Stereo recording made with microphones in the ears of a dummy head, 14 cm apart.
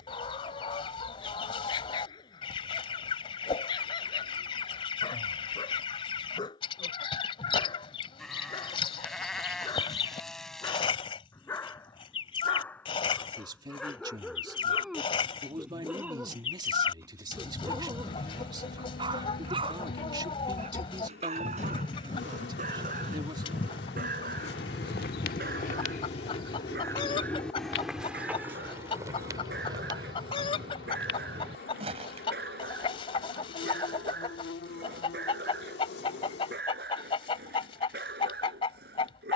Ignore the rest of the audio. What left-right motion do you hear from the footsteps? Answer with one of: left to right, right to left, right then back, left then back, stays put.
left to right.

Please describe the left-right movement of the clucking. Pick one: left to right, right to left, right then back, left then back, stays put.
stays put.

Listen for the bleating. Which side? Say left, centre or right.
centre.